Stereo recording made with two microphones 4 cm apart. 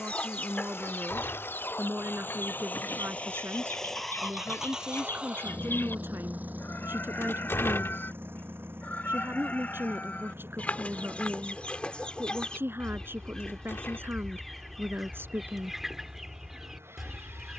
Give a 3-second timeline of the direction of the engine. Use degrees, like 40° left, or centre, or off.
60° left, 10° right, 50° right, 60° right, 70° right, 70° right.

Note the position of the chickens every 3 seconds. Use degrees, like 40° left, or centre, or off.
50° left, 60° left, 50° left, 40° left, 10° left, 10° right.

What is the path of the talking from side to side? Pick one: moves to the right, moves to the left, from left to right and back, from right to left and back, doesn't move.
doesn't move.